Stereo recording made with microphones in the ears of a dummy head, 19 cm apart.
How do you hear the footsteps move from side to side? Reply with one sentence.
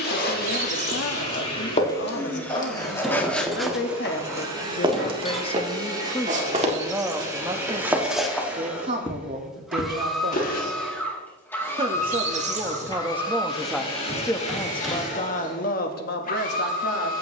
You can hear the footsteps move from left to right and back again.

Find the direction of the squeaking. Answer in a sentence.
In this clip you hear the squeaking on the right.